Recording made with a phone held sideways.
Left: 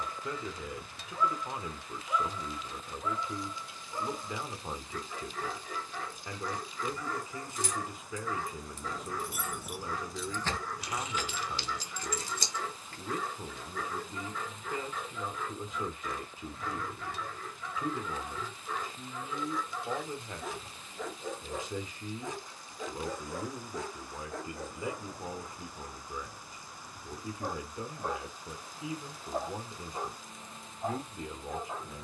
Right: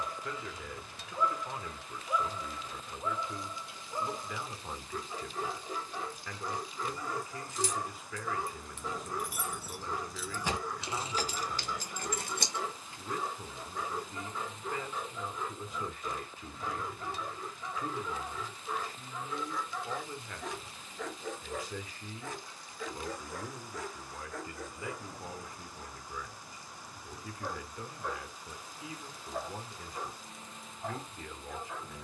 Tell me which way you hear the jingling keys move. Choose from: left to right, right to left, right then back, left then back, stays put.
left to right.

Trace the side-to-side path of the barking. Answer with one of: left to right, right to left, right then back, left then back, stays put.
right to left.